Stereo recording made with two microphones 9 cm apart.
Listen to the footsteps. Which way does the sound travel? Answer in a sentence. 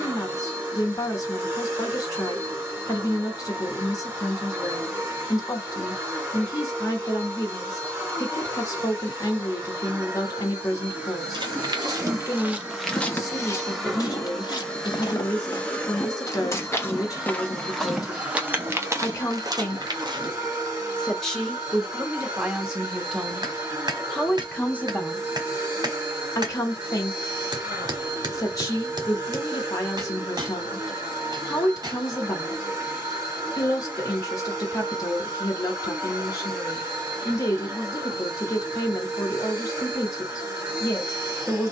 In this clip you hear the footsteps move from right to left and back again.